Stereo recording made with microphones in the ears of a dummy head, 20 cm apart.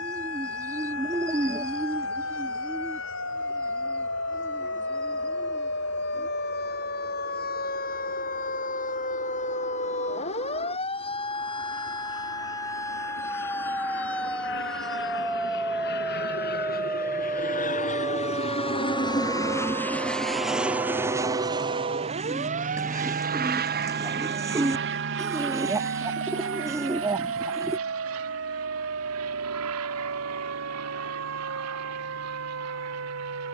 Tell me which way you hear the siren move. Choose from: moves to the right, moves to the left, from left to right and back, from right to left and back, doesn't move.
moves to the right.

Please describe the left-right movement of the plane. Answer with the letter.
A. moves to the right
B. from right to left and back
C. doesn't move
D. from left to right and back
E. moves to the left
A.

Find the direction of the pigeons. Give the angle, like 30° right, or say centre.
10° right.